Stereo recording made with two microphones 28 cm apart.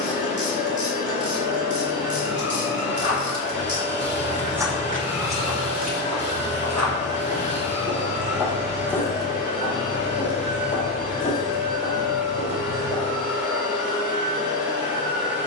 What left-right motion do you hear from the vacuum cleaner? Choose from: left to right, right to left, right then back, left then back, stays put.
stays put.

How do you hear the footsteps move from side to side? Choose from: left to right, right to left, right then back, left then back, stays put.
right then back.